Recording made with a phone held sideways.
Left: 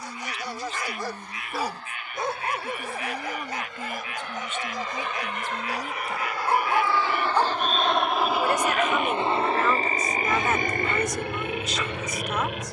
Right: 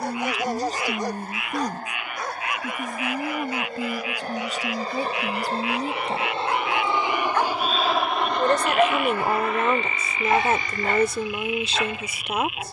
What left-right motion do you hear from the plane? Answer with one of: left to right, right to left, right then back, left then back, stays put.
right to left.